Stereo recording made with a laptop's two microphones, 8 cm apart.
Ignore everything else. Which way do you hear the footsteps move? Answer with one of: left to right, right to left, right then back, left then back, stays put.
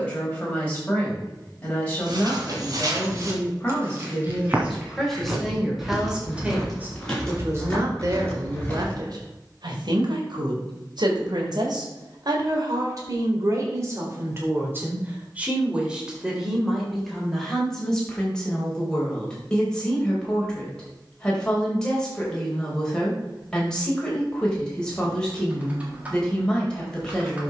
right to left.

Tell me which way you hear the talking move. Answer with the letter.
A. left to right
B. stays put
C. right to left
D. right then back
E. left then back
D.